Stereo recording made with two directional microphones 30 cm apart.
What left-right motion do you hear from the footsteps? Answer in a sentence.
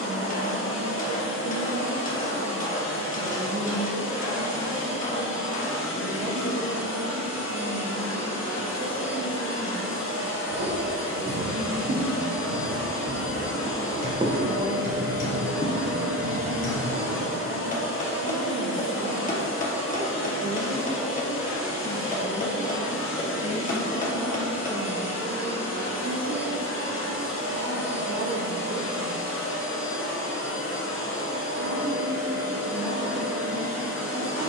In this clip you hear the footsteps go from the right side to the left.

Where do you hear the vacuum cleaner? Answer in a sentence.
In this clip you hear the vacuum cleaner on the left.